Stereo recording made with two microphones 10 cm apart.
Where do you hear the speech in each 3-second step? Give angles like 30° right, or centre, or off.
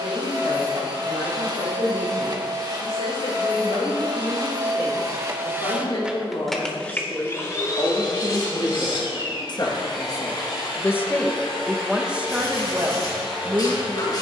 80° left, 70° left, 60° left, 20° left, 30° right.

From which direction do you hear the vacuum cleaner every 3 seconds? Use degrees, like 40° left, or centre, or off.
50° right, 40° right, 30° left, 60° left, 70° left.